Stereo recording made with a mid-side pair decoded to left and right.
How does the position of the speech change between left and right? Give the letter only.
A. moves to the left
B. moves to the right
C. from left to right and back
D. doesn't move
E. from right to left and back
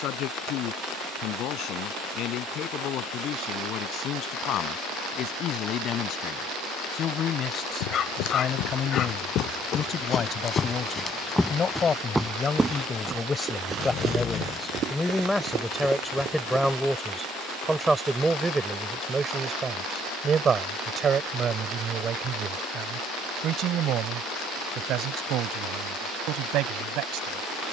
B.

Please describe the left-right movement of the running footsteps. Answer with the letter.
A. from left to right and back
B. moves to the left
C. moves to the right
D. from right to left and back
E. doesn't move
C.